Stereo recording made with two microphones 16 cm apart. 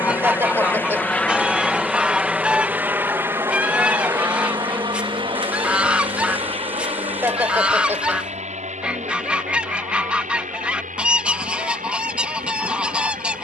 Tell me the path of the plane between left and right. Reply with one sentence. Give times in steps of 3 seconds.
In this clip you hear the plane in the centre from 0 s and on the right from 3 s.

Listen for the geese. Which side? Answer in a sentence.
You can hear the geese in the centre.